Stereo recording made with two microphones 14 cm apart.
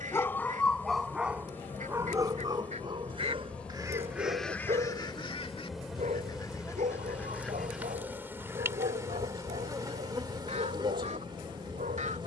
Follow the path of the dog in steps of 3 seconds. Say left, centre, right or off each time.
centre, right, right, right.